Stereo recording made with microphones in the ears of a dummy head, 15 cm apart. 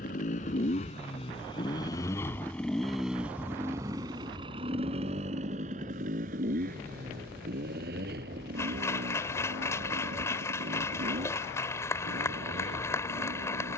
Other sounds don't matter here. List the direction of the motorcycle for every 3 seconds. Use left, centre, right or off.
left, right, right, right, right.